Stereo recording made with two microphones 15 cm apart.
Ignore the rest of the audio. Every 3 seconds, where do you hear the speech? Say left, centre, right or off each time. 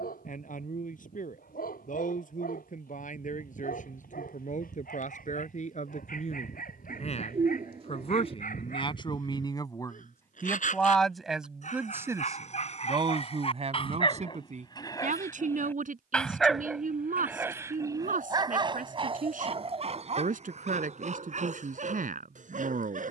left, left, left, centre, right, right, right, right.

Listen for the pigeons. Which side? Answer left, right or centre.
right.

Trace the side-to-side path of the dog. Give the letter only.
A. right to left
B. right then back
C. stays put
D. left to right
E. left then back
D.